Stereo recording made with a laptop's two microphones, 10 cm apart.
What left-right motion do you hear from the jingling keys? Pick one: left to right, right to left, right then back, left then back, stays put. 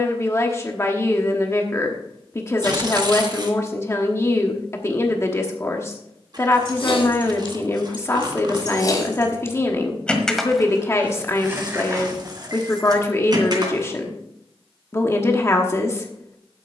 left to right.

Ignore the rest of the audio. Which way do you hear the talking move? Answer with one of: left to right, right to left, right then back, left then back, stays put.
stays put.